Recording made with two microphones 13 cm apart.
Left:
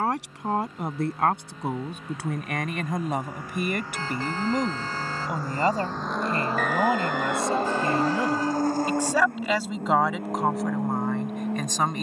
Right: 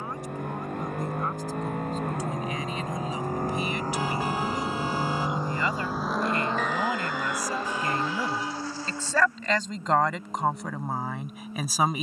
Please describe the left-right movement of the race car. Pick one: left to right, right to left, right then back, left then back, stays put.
right to left.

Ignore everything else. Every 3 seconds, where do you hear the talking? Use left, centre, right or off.
left, left, left, centre.